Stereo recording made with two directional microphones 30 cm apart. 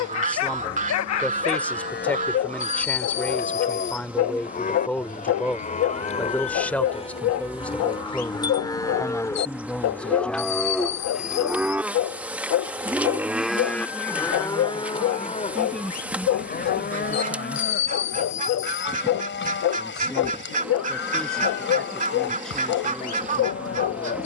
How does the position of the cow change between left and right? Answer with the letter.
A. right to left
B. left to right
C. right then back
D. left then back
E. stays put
C.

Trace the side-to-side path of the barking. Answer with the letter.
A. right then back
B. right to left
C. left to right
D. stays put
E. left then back
D.